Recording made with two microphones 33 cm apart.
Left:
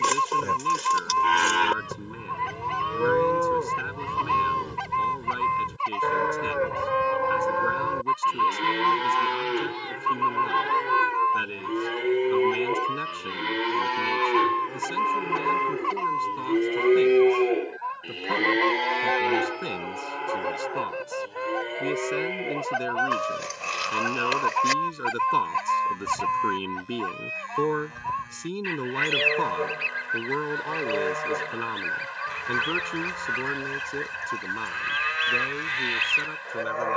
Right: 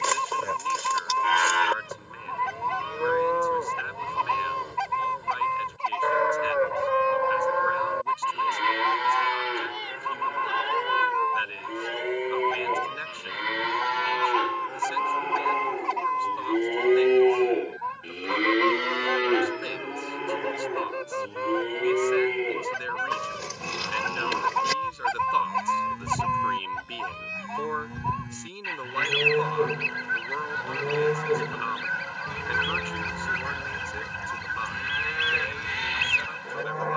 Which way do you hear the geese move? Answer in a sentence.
You can hear the geese move from right to left and back again.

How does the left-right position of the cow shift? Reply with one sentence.
In this clip you hear the cow move to the right.